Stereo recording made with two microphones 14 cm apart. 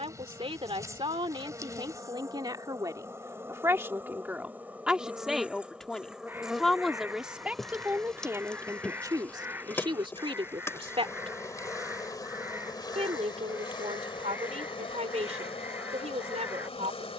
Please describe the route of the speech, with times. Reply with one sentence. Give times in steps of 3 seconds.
In this clip you hear the speech on the right from 0 s, in the centre from 3 s and on the right from 9 s.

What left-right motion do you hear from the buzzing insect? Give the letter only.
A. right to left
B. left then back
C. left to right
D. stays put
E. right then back
A.